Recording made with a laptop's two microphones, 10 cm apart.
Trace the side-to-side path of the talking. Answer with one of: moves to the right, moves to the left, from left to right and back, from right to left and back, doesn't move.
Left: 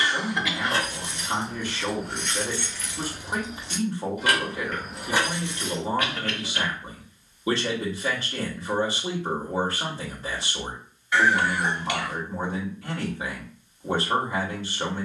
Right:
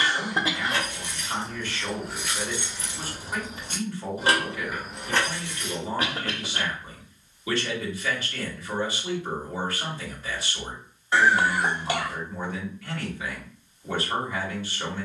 doesn't move.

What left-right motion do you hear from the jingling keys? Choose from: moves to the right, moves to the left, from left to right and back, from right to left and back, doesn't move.
from left to right and back.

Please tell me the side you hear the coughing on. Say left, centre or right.
right.